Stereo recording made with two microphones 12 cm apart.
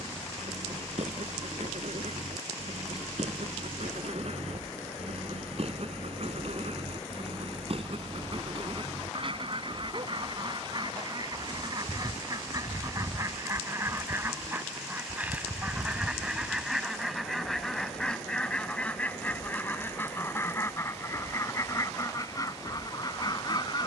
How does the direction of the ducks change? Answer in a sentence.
You can hear the ducks move from right to left.